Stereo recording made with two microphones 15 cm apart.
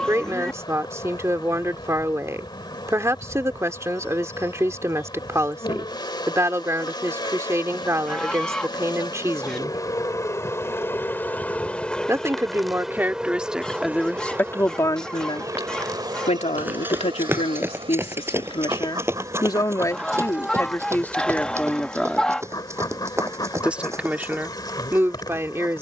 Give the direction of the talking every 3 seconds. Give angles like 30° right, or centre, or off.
20° right, 20° right, 20° right, 20° right, centre, 50° left, 30° left, centre, 20° right.